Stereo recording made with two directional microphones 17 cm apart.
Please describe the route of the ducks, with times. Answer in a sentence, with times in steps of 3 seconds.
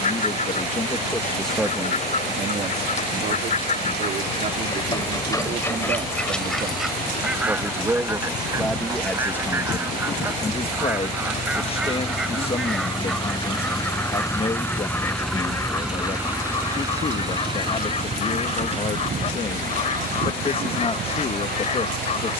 You can hear the ducks on the left from 0 s, in the centre from 6 s and on the left from 15 s.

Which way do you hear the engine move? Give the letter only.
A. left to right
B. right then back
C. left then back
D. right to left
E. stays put
A.